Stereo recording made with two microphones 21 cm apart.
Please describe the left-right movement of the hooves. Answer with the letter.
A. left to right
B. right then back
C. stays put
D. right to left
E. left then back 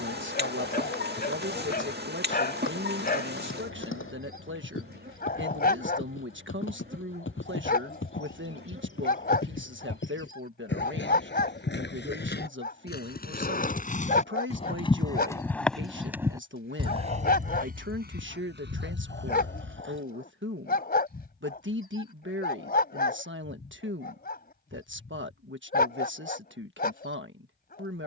A.